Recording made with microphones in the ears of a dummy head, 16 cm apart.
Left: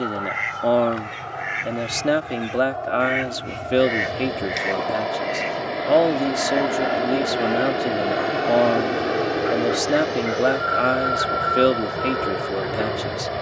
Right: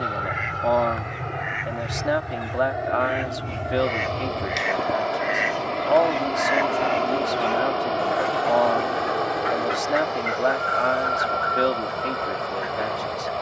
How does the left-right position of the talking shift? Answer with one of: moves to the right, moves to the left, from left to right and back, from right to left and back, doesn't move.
doesn't move.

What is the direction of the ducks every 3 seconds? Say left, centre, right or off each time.
left, centre, right, right, right.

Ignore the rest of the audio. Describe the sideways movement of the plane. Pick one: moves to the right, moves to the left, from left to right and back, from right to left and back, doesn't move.
moves to the left.